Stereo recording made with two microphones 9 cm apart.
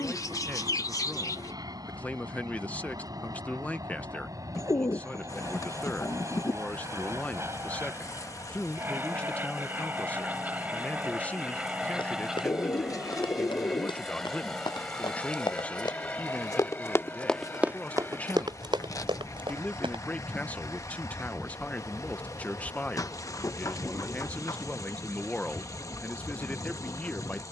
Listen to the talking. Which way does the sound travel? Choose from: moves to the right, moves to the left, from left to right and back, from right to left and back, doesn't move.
doesn't move.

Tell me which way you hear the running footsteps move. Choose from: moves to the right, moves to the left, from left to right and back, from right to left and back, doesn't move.
moves to the right.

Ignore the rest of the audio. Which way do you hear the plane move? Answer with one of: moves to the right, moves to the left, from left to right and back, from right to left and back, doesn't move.
moves to the left.